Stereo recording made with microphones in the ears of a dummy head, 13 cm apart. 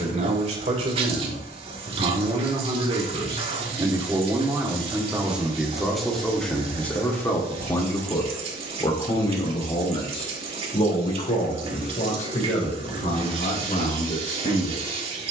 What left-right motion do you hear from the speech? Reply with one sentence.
In this clip you hear the speech move from right to left.